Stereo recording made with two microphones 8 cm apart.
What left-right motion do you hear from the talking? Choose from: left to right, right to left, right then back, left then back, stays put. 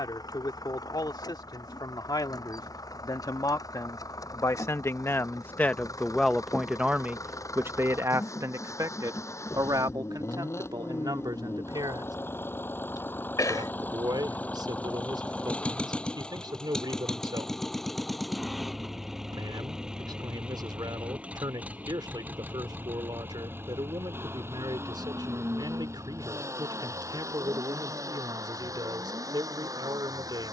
left to right.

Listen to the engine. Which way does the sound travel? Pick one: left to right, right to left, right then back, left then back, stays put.
left to right.